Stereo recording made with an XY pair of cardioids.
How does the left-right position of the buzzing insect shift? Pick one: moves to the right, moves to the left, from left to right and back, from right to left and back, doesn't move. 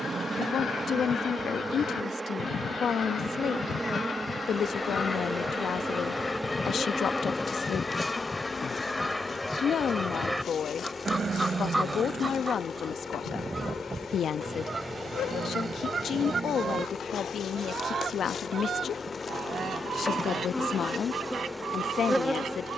from right to left and back.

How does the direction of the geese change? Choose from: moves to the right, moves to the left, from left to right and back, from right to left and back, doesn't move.
moves to the right.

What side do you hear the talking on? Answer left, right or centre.
left.